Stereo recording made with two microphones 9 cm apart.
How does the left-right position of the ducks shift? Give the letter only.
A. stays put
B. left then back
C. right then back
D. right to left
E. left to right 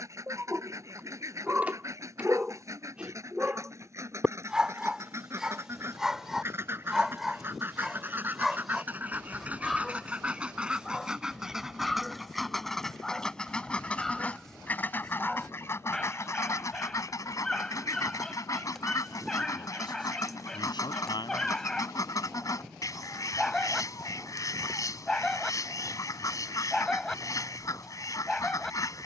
D.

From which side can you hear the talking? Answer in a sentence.
In this clip you hear the talking on the left.